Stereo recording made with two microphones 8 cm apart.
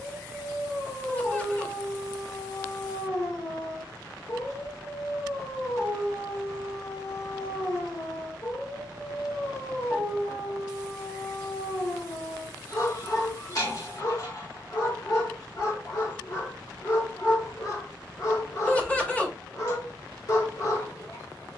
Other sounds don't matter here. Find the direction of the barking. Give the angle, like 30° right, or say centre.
50° left.